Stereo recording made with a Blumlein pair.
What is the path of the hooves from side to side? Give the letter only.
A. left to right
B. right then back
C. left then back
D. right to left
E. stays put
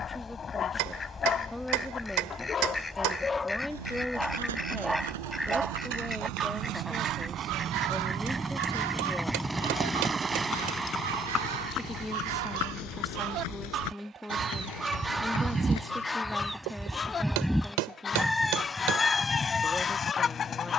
D.